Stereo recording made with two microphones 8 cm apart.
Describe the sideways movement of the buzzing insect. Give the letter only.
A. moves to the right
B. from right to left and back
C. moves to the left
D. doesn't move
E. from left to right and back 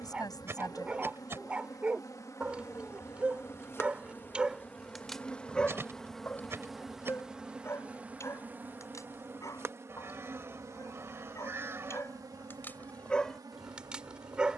A.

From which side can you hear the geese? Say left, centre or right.
right.